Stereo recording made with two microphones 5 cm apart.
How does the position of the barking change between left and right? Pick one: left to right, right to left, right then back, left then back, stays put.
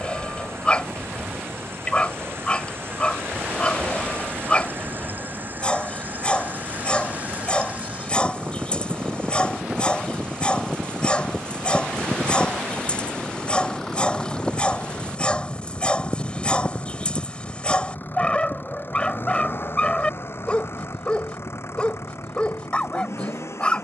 stays put.